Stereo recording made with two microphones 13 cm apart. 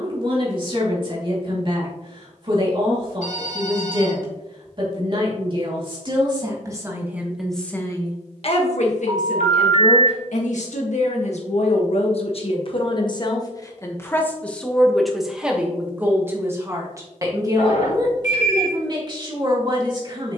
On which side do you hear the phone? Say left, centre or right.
left.